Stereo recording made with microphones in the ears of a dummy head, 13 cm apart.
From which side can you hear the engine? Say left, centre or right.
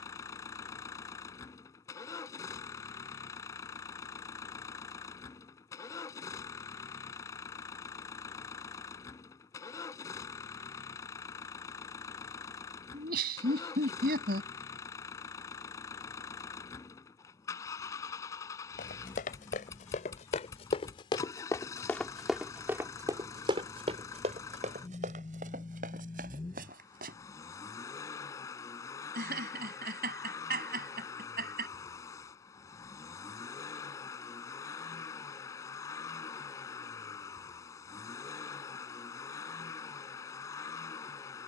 left.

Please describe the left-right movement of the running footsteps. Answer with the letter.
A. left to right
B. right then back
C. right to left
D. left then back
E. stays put
A.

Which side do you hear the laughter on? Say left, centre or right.
right.